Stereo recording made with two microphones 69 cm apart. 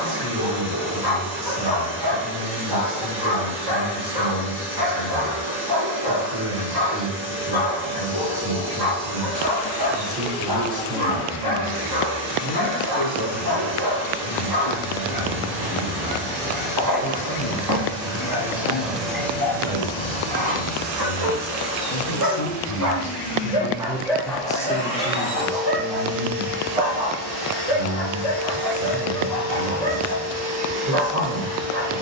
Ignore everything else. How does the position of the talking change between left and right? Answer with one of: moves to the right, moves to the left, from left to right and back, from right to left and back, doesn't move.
from right to left and back.